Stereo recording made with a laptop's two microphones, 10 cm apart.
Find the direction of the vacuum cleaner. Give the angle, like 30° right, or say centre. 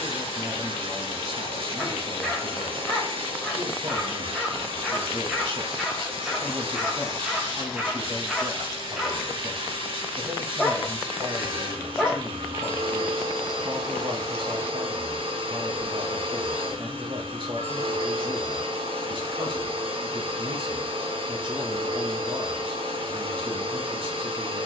70° right.